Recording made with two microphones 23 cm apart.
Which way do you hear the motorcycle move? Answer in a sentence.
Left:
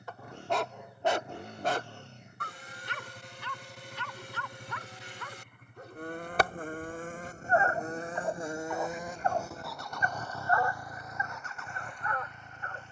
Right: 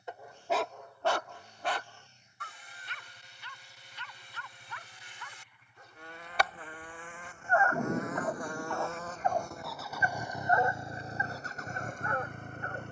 You can hear the motorcycle move from left to right.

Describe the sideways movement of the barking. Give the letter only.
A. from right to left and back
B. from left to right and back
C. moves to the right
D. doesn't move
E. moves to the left
A.